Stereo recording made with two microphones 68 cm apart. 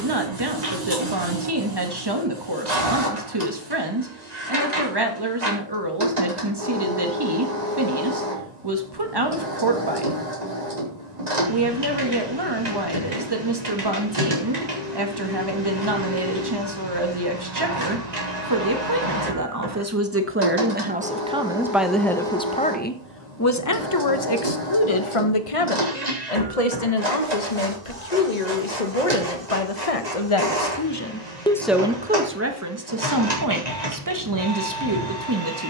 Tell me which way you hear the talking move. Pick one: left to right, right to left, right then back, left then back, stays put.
left then back.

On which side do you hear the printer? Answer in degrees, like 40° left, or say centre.
80° right.